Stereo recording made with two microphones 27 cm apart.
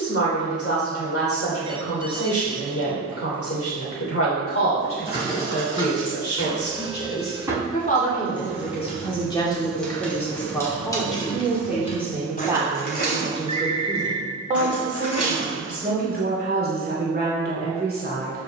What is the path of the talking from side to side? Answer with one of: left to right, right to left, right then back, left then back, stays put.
left to right.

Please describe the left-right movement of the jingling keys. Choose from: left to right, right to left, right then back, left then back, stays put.
right to left.